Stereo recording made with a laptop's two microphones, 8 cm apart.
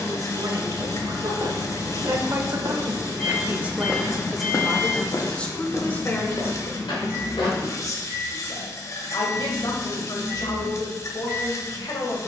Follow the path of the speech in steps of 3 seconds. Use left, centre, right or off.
right, centre, left, left.